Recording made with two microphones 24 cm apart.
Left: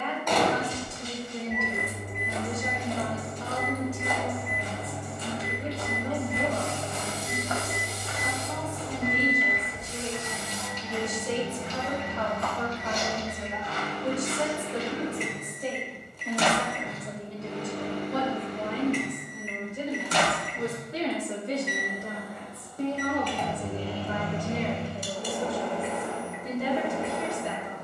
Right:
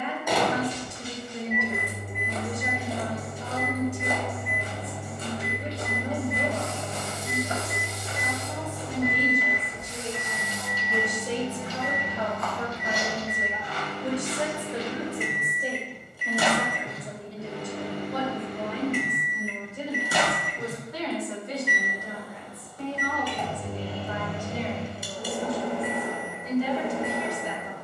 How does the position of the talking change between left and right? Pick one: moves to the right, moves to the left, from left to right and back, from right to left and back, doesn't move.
moves to the left.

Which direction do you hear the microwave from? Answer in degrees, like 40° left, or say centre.
10° right.